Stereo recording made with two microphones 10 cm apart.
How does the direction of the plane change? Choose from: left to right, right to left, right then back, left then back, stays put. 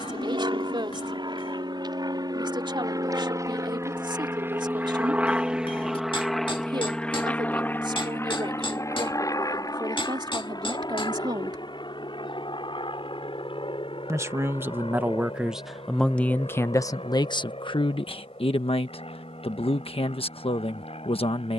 right to left.